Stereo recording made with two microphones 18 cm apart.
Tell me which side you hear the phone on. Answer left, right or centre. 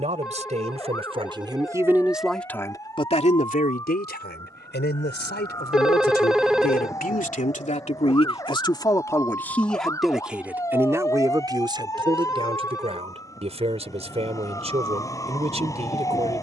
centre.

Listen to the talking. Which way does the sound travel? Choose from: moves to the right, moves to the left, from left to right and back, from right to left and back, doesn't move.
from right to left and back.